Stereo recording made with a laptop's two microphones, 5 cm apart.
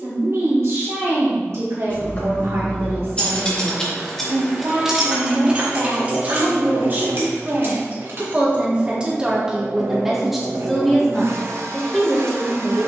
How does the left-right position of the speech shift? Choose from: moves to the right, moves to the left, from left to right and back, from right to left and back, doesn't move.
moves to the left.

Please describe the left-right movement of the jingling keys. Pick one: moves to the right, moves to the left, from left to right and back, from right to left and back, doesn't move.
moves to the right.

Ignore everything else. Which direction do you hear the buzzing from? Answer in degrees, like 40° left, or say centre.
70° right.